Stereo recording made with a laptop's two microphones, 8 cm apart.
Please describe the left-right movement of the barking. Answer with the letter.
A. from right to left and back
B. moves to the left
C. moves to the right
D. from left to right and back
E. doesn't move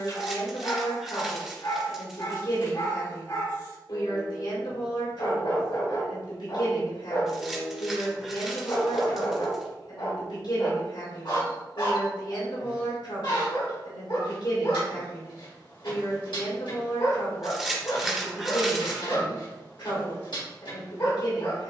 E.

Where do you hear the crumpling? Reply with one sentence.
In this clip you hear the crumpling in the centre.